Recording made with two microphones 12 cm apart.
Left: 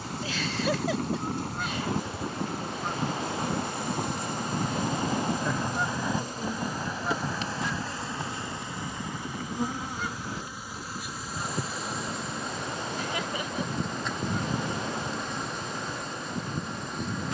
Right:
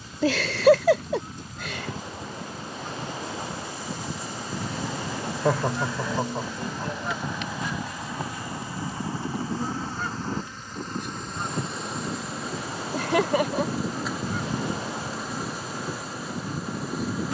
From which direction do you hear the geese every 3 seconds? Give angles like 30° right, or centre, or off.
60° left, 40° left, 10° right, 40° right, 50° right, 50° right.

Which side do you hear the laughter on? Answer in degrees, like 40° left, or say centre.
70° right.